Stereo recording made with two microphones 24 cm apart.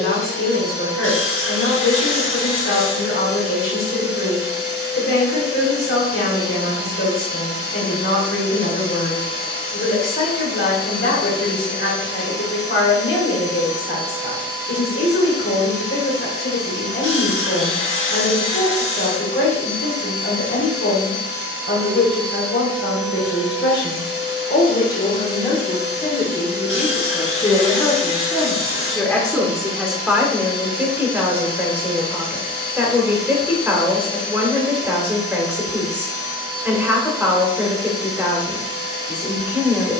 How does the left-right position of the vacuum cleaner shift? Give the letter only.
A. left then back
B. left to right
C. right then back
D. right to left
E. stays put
E.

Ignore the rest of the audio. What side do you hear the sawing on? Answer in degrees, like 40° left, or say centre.
50° left.